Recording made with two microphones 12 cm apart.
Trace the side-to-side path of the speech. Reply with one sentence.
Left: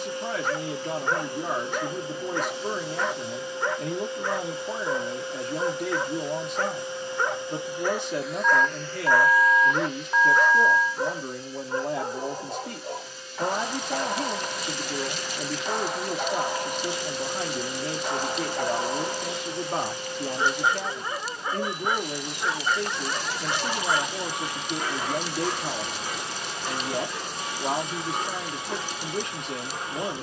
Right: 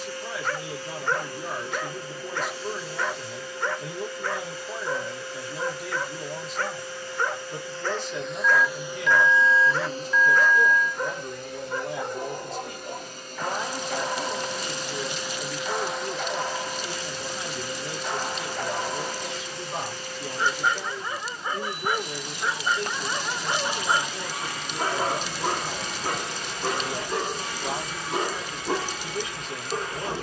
In this clip you hear the speech stay put.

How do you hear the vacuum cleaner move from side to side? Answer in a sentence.
You can hear the vacuum cleaner go right and come back.